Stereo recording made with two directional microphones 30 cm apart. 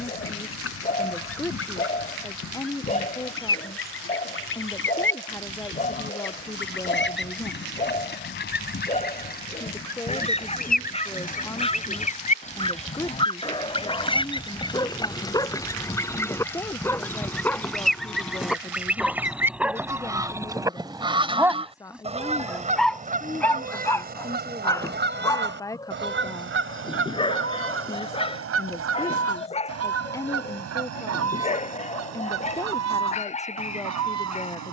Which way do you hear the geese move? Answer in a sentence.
In this clip you hear the geese travel towards the right.